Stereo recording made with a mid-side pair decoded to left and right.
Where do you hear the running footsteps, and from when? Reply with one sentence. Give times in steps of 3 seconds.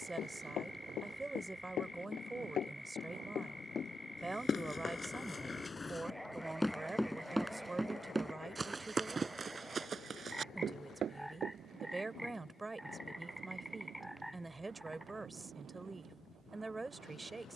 In this clip you hear the running footsteps on the left from 0 s, in the centre from 6 s, on the right from 9 s and not at all from 12 s.